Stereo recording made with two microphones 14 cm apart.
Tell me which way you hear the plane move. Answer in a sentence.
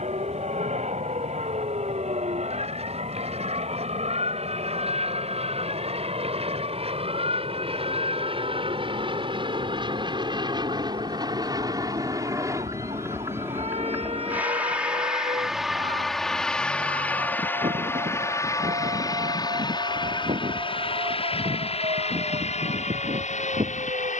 You can hear the plane move to the left.